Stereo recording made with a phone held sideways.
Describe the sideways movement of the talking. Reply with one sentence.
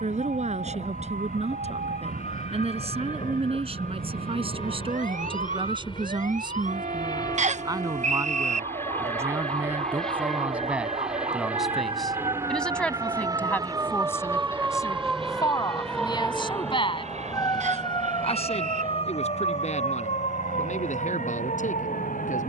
You can hear the talking move from right to left.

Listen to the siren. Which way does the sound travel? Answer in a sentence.
You can hear the siren move to the left.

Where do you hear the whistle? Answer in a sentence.
In this clip you hear the whistle on the right.